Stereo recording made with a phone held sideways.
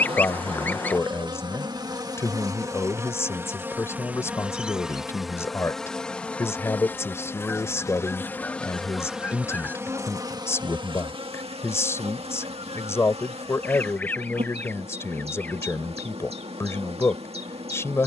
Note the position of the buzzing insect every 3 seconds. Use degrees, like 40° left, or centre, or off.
30° right, 10° right, 10° left, 30° right, 40° right, 40° right.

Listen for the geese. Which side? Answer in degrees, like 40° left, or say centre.
10° left.